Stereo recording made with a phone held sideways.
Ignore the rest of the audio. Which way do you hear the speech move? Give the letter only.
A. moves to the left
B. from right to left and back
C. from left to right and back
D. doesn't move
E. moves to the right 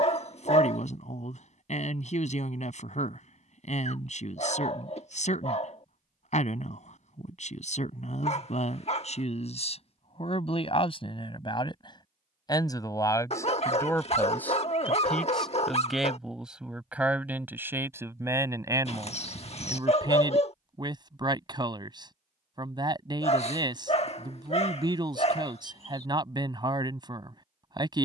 E.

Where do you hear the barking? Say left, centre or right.
left.